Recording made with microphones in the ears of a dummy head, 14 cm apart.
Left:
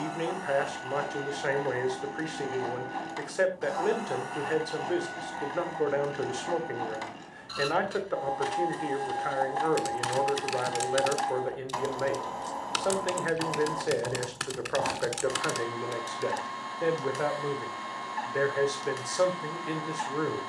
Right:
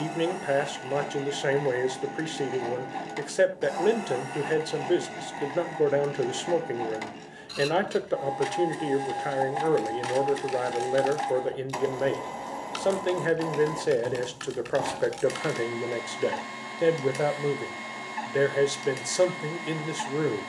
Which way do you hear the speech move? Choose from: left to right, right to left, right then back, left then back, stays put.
stays put.